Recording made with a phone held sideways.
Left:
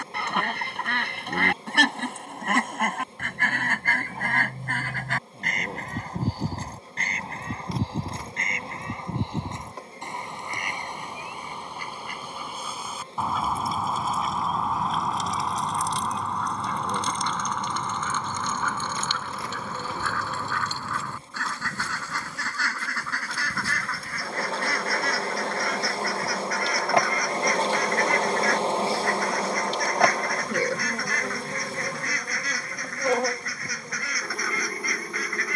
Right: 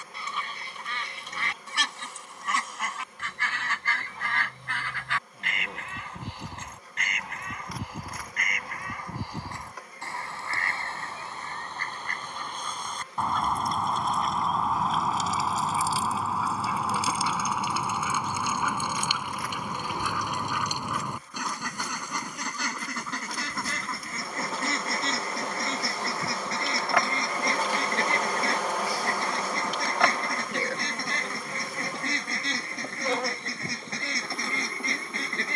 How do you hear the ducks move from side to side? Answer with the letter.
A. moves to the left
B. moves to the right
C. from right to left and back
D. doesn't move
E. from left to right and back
B.